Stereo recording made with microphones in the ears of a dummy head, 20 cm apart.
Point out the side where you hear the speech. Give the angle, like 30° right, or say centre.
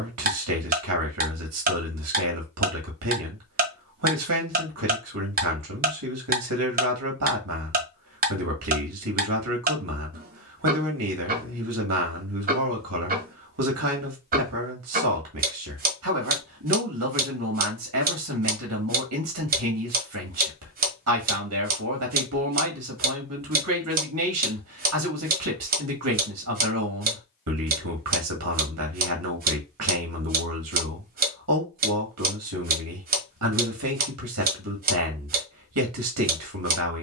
80° right.